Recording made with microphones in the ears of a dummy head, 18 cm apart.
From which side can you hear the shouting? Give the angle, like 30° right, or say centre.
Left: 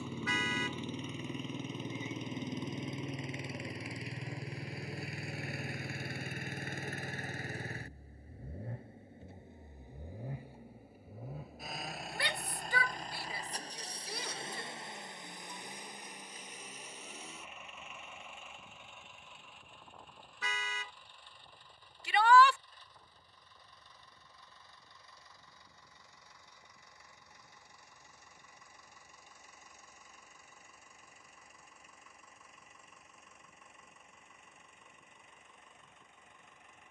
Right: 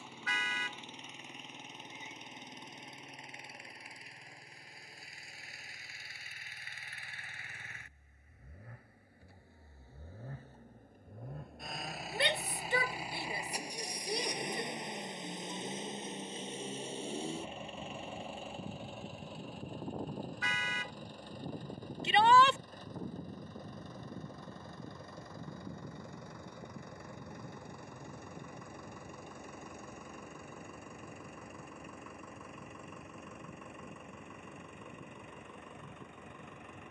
20° right.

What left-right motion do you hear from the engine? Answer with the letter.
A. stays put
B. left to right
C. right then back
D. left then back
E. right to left
B.